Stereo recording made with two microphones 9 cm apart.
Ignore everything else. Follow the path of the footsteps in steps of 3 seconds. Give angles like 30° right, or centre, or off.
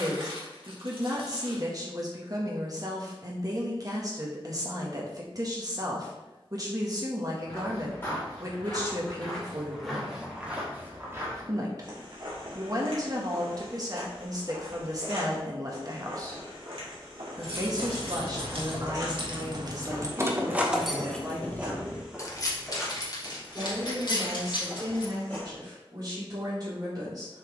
off, off, 20° left, 10° right, 70° right, 70° right, 40° right, centre, 20° left.